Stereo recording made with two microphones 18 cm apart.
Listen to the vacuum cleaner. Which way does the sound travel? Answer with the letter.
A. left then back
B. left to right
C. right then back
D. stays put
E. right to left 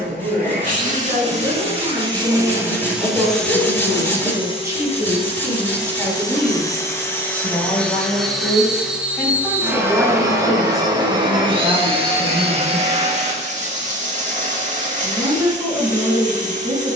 A.